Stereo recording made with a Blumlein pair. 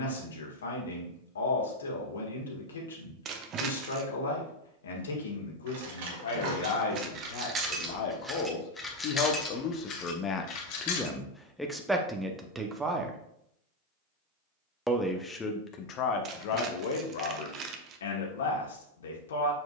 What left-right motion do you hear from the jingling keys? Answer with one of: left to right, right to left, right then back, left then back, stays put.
right to left.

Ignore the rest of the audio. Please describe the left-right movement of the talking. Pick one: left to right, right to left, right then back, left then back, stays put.
right then back.